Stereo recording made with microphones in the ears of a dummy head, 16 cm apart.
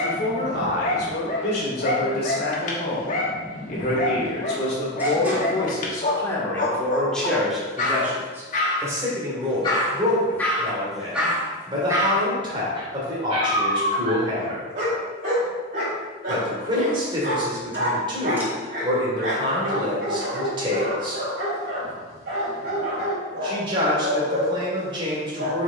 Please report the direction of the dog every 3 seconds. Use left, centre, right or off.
left, left, left, centre, right, right, right, right, right.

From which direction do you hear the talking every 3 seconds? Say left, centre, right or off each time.
left, left, centre, right, right, right, right, right, right.